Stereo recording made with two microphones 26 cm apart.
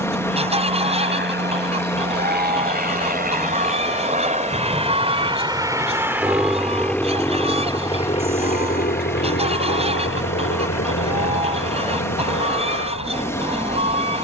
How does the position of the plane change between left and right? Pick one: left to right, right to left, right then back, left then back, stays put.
right to left.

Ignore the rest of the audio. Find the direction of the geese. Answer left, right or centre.
right.